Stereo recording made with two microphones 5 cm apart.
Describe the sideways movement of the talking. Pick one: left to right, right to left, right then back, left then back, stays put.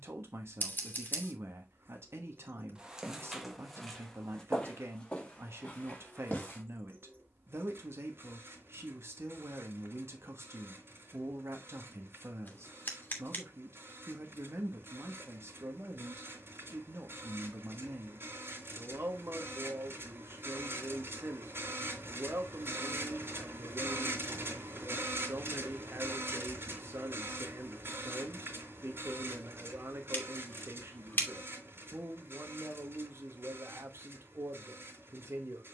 stays put.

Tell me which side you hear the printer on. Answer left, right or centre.
right.